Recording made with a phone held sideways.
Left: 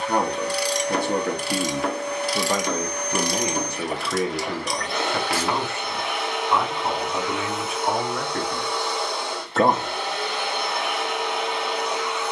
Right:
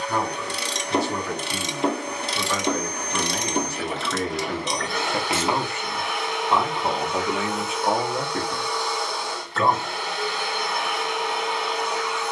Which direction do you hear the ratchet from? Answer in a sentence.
In this clip you hear the ratchet on the right.